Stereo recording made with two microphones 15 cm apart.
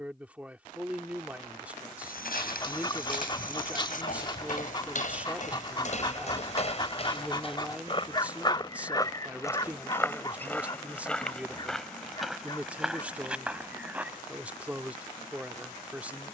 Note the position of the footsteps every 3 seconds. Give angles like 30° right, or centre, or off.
80° left, 60° left, 40° left, 10° left, 10° right, off.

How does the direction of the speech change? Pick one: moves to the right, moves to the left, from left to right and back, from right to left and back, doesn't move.
doesn't move.